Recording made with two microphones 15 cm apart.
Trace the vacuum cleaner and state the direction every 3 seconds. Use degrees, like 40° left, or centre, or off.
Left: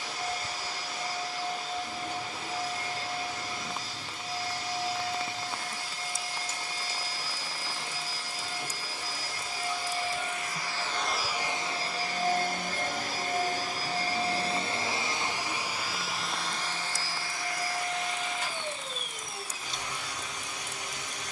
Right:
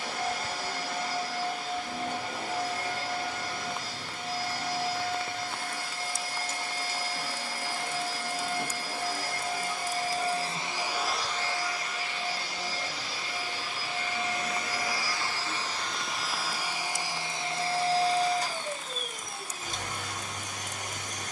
60° right, 60° right, 60° right, 20° right, 40° left, 10° right, 50° right.